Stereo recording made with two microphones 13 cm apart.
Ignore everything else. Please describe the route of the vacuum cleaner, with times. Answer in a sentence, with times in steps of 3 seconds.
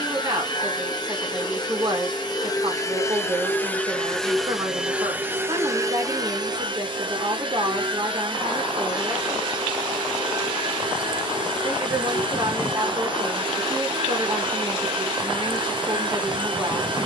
You can hear the vacuum cleaner on the left from 0 s, in the centre from 3 s and on the right from 6 s.